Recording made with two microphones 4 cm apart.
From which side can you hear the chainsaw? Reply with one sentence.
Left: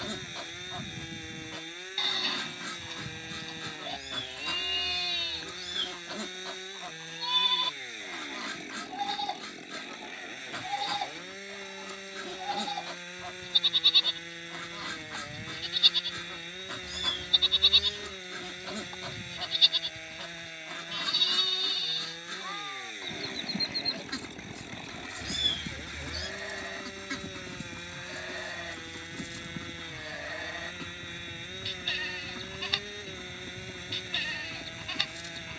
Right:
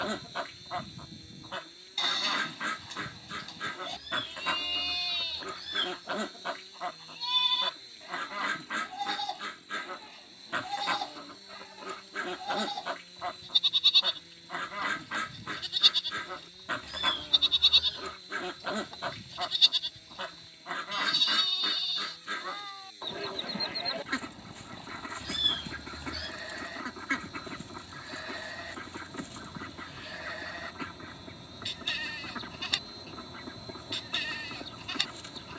In this clip you hear the chainsaw on the left.